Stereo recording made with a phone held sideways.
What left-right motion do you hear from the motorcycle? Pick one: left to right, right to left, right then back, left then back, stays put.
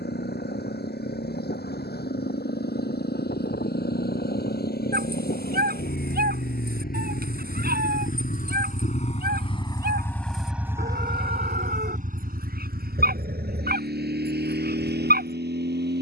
left to right.